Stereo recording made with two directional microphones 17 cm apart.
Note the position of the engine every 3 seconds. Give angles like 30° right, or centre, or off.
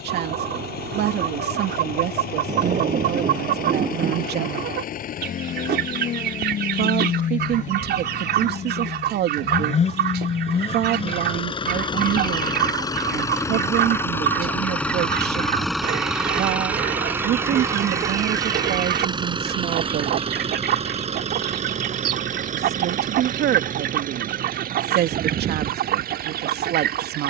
60° left, 50° left, 50° left, 30° left, 20° left, 10° right, 30° right, 40° right, 60° right.